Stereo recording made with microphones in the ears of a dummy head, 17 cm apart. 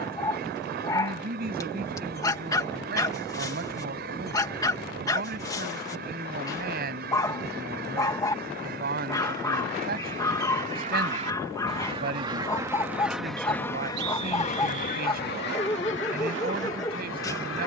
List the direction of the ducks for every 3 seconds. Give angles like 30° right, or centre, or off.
60° right, 60° right, 60° right, 50° right, 10° left, 70° left.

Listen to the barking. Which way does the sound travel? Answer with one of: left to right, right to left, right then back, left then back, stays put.
stays put.